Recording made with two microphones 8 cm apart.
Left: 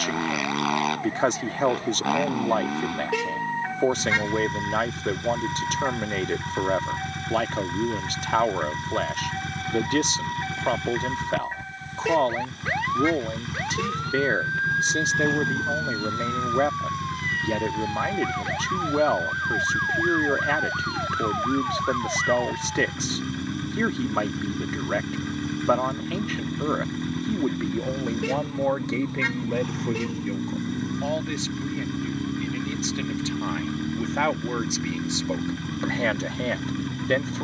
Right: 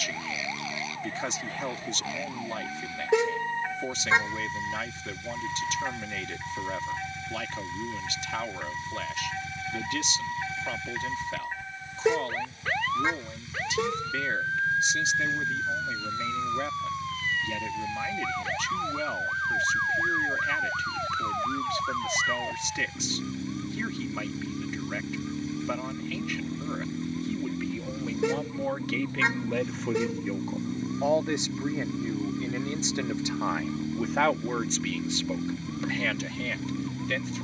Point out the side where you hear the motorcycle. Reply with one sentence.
In this clip you hear the motorcycle on the left.